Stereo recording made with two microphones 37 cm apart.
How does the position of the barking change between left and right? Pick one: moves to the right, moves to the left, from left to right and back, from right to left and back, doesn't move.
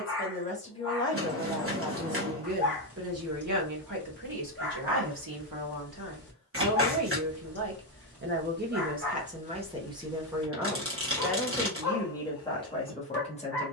doesn't move.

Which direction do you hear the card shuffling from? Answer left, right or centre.
right.